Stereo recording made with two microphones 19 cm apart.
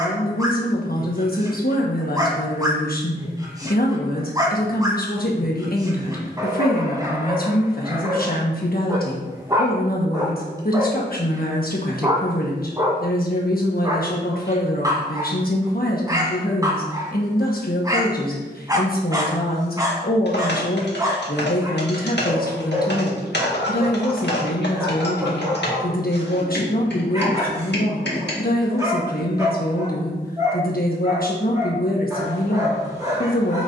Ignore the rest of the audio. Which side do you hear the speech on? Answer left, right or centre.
left.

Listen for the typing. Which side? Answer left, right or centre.
left.